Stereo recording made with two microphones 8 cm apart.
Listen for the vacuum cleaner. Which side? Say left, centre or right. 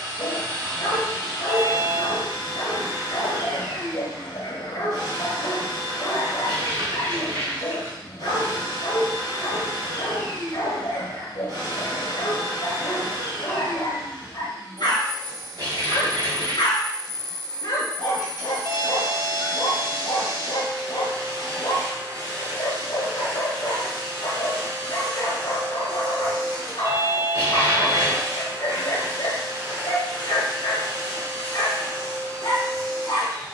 right.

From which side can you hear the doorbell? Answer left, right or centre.
right.